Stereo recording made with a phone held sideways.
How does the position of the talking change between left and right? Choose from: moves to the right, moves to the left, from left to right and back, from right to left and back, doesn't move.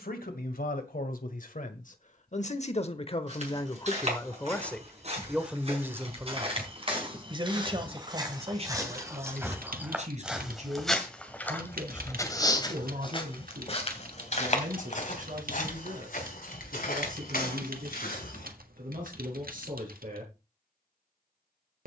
moves to the right.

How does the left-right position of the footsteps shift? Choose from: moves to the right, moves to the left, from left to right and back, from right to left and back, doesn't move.
moves to the left.